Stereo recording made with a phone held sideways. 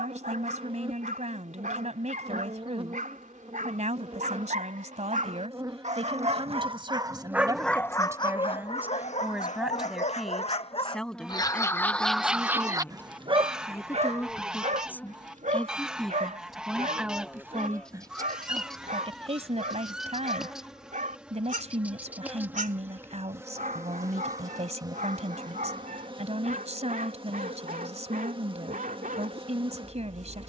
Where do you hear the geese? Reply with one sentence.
You can hear the geese in the centre.